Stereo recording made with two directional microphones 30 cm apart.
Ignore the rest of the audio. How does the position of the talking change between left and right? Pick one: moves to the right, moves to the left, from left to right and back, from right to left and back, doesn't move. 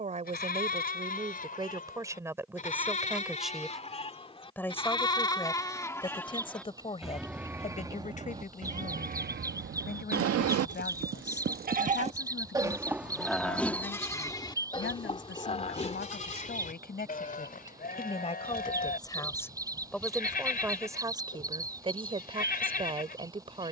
from right to left and back.